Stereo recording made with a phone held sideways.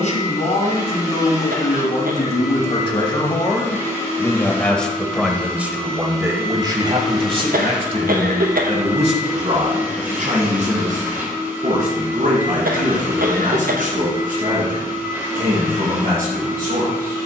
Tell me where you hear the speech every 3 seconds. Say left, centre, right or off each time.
left, centre, right, right, right, right.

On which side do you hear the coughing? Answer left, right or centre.
right.